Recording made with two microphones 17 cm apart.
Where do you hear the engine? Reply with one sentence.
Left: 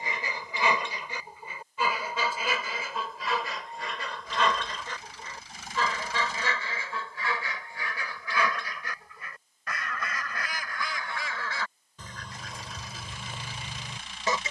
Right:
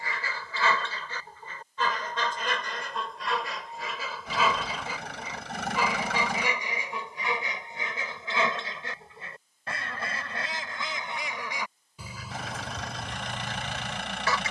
You can hear the engine on the right.